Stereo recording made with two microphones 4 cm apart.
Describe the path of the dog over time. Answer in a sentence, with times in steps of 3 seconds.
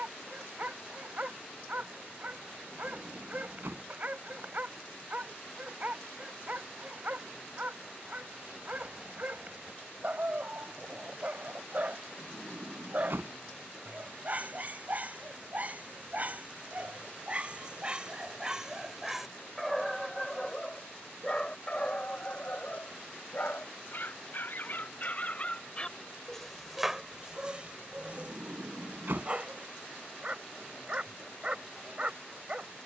You can hear the dog on the right from 0 s, in the centre from 18 s, on the left from 21 s and on the right from 27 s.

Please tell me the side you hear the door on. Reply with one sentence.
You can hear the door on the right.